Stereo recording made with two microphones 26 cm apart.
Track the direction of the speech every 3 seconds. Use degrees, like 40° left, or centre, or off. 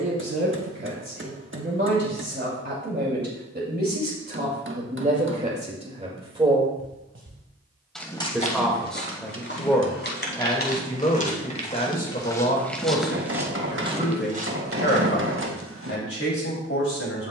50° right, 30° right, 10° right, 20° left, 40° left, 50° left.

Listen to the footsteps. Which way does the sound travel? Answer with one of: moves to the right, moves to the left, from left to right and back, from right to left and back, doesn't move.
from right to left and back.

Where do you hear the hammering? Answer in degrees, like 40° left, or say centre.
50° right.